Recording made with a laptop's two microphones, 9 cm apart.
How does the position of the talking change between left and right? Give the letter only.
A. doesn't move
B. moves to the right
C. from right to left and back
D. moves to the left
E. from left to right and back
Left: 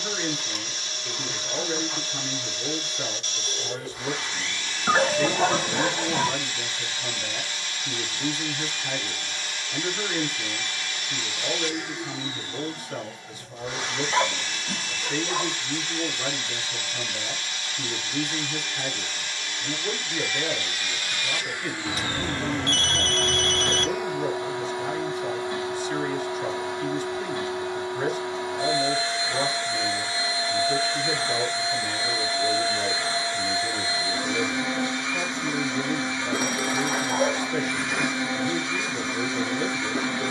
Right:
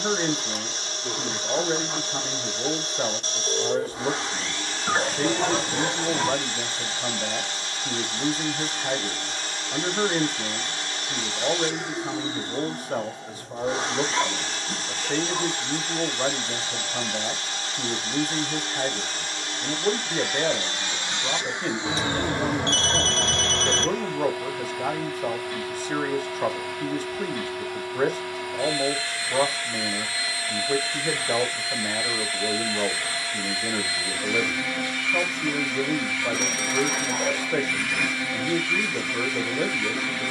A.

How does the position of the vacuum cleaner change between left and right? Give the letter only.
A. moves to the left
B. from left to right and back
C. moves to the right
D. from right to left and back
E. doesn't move
A.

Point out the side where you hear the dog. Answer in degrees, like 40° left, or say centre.
30° left.